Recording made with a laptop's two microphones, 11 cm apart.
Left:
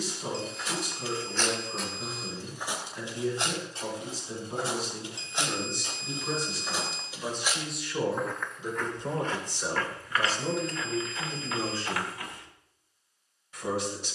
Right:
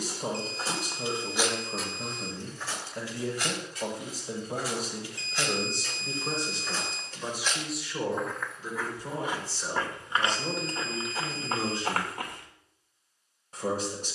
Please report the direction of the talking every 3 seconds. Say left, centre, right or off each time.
right, right, centre, centre, right.